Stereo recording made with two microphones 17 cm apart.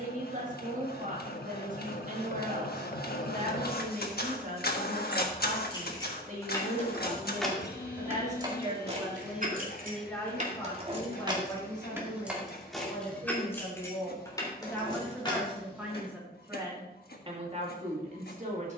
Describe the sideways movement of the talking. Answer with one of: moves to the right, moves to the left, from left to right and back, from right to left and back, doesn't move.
from right to left and back.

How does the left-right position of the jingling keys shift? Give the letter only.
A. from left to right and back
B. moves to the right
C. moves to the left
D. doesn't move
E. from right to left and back
A.